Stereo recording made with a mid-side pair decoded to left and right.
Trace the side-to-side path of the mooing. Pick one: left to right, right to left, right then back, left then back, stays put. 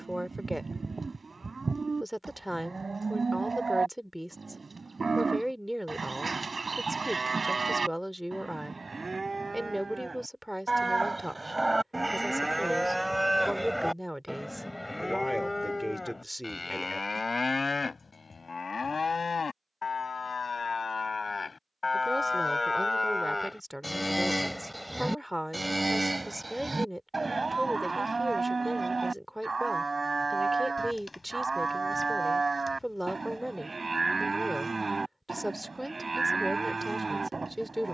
left then back.